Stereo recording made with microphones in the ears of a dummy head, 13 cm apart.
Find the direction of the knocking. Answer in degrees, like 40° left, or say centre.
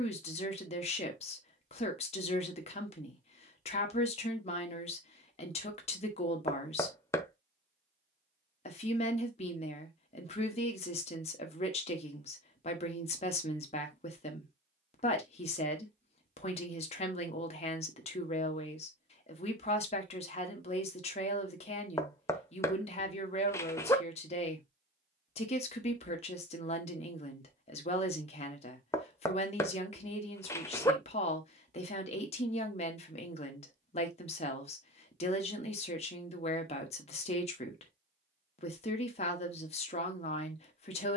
20° left.